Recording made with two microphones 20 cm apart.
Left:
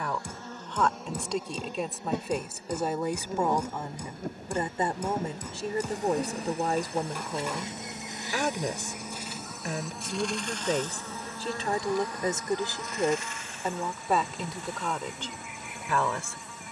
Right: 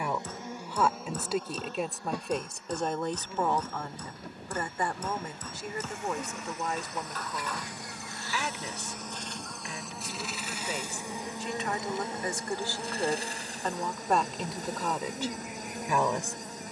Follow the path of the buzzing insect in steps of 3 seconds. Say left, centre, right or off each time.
centre, left, left, centre, right, right.